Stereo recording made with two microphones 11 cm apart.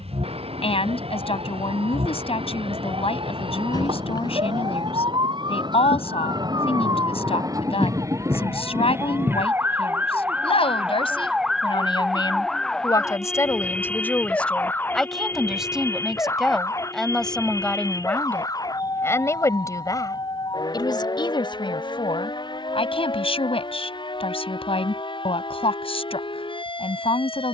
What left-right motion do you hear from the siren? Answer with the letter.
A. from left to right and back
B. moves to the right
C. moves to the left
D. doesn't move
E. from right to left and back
C.